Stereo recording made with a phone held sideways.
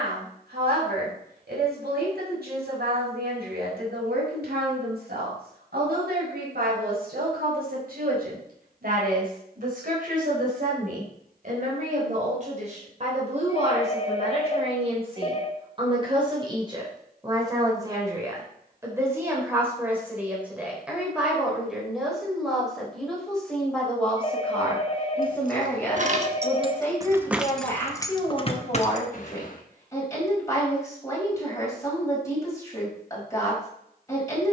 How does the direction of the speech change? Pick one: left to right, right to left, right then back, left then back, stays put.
right to left.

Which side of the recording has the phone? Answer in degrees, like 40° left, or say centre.
40° left.